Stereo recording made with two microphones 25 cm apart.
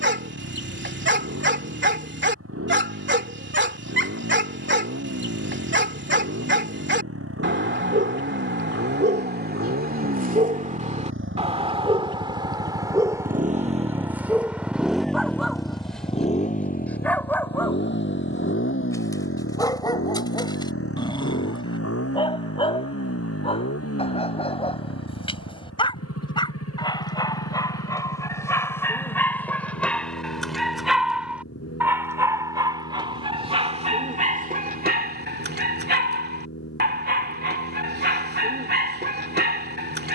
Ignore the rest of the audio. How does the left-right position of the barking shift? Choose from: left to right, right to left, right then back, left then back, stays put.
left then back.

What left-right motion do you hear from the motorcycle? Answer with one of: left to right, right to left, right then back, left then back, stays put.
right to left.